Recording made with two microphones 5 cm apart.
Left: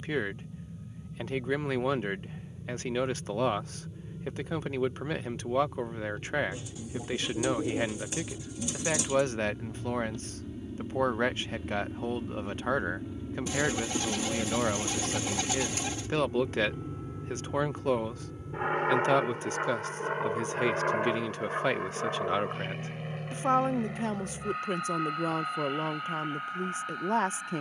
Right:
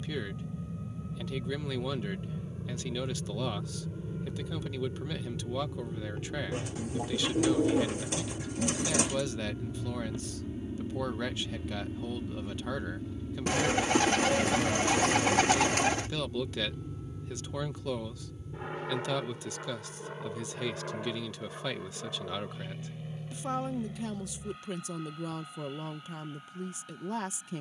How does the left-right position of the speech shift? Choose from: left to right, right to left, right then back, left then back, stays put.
stays put.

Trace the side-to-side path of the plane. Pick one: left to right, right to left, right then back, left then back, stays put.
right to left.